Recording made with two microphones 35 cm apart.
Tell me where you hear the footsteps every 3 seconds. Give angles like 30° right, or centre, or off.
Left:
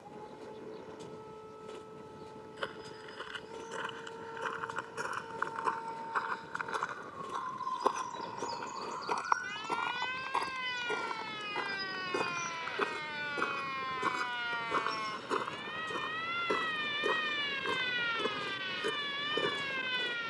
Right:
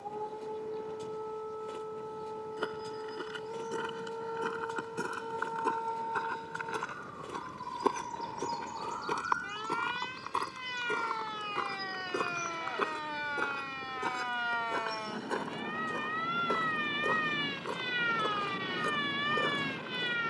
60° right, 60° right, 40° right, 20° right, centre, 20° left, 30° left.